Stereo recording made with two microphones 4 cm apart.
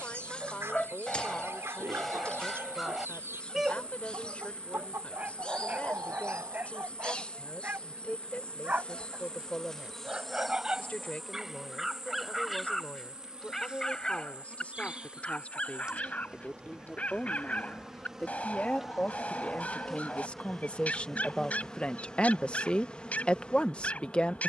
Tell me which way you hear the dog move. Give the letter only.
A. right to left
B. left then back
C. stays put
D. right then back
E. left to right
D.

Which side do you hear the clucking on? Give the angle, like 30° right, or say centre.
70° right.